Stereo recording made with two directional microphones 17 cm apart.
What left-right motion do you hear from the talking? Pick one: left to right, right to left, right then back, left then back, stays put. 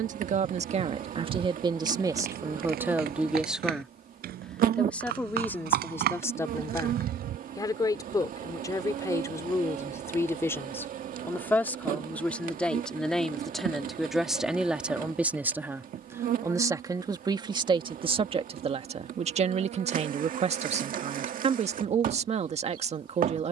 left then back.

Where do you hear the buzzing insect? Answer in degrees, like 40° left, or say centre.
50° right.